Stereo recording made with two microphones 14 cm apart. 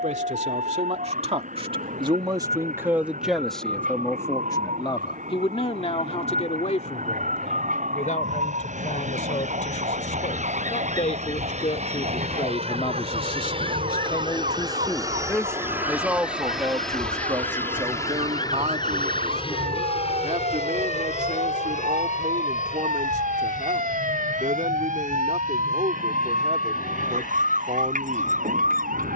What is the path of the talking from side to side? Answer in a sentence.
You can hear the talking go left and come back.